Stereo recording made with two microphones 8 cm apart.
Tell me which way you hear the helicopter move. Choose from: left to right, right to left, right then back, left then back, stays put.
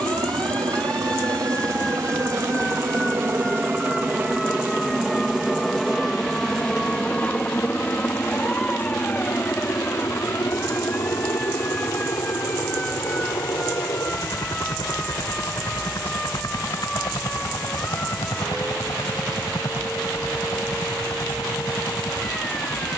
right to left.